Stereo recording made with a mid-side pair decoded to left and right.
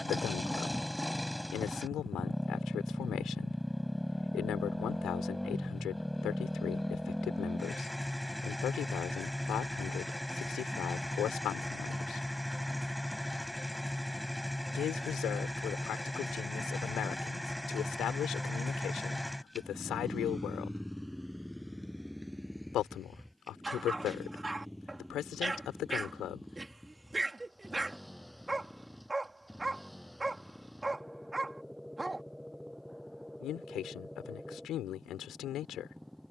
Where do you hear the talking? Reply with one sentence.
You can hear the talking on the left.